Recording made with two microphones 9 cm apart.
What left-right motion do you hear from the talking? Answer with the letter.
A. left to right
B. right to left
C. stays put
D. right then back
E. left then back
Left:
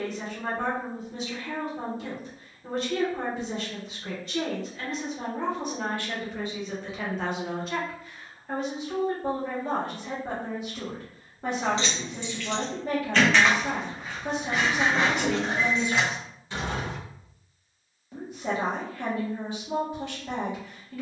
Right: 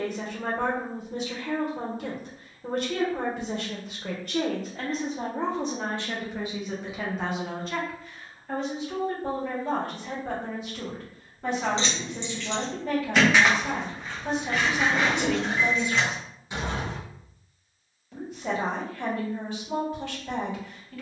B.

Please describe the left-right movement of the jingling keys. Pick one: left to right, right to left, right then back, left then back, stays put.
left then back.